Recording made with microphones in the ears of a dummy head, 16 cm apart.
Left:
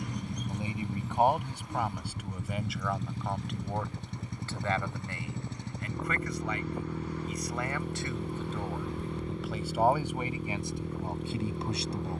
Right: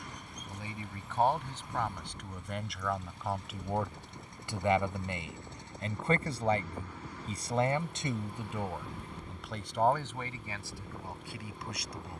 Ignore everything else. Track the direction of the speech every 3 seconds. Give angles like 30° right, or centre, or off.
10° left, 10° right, 20° right, 20° left.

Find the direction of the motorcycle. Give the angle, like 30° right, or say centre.
60° left.